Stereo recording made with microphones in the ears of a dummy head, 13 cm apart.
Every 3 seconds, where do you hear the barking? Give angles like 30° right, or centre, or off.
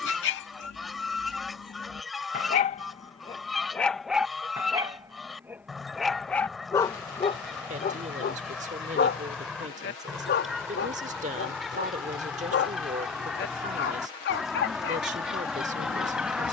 60° left, centre, 30° left, 70° left, 80° left, off.